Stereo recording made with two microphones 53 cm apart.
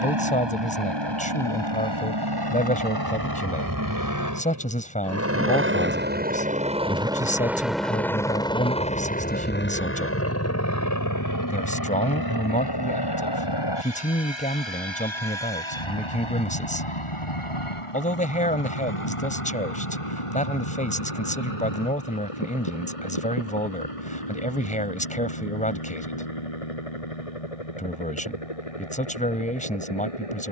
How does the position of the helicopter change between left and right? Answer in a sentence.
You can hear the helicopter travel towards the left.